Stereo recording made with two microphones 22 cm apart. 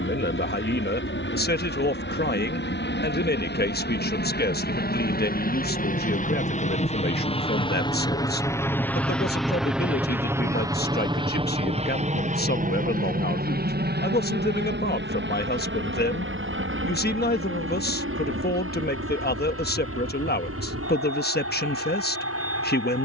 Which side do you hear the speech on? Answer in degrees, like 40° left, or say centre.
50° left.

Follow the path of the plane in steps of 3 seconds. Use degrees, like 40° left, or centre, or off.
60° left, 50° left, 20° left, 10° right, 40° right, 60° right, 60° right, 70° right.